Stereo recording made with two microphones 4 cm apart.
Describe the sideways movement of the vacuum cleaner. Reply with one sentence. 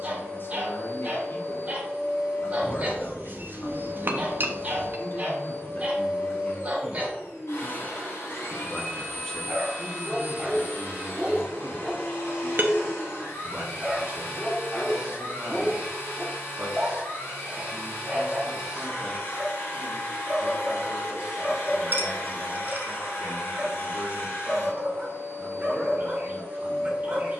In this clip you hear the vacuum cleaner stay put.